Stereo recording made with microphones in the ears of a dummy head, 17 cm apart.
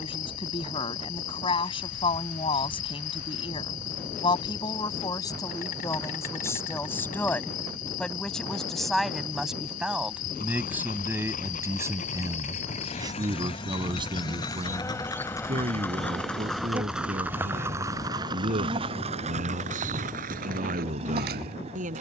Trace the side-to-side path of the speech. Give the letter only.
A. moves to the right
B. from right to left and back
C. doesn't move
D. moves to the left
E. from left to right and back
A.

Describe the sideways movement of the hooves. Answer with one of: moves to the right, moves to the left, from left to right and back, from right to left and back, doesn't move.
moves to the right.